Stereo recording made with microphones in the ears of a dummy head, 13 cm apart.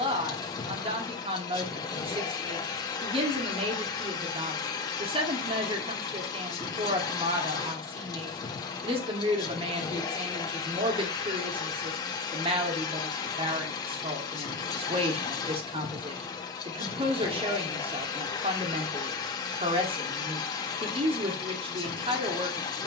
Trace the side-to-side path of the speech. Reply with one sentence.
In this clip you hear the speech stay put.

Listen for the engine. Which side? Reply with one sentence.
You can hear the engine on the left.